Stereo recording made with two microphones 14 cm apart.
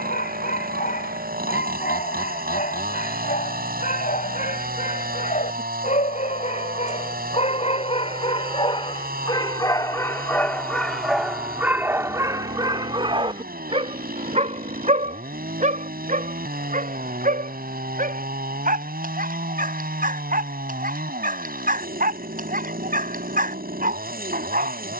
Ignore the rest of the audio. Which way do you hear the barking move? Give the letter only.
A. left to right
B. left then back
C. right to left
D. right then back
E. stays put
A.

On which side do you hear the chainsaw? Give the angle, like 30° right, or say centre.
80° right.